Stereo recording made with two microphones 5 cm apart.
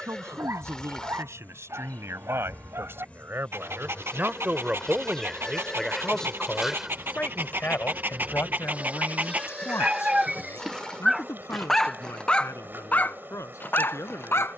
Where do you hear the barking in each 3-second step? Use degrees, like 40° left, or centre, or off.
60° right, 60° right, 40° right, 10° right, 40° left.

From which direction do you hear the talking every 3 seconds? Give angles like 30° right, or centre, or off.
60° right, 30° right, 40° left, 60° left, 70° left.